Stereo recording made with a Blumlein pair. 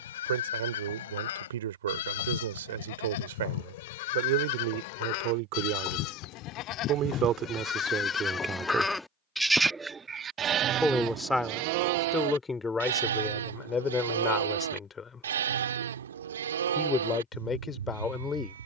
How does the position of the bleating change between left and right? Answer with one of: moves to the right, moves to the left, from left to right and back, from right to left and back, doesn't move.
moves to the right.